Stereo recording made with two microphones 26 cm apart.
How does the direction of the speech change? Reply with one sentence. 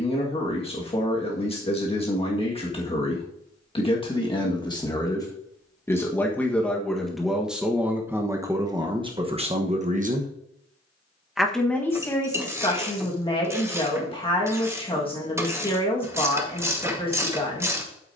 You can hear the speech go right and come back.